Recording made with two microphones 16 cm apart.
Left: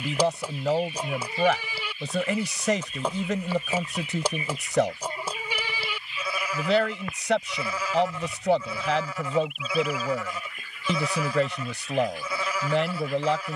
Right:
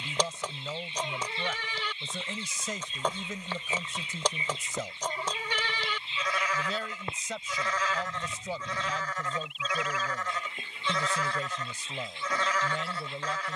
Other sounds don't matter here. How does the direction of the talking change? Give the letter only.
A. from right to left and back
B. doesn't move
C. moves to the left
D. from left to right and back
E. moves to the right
B.